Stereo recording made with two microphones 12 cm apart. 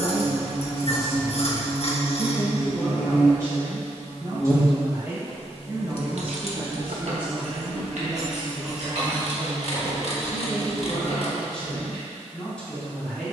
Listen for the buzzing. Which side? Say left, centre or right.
left.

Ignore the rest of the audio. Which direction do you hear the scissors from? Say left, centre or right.
left.